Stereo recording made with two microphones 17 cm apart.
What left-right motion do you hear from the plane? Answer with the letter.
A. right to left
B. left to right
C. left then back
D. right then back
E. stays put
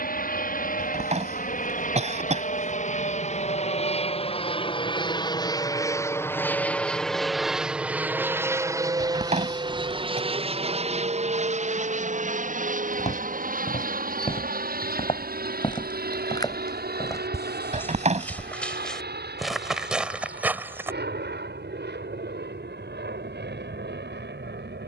B.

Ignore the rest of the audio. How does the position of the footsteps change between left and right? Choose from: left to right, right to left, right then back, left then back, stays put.
left to right.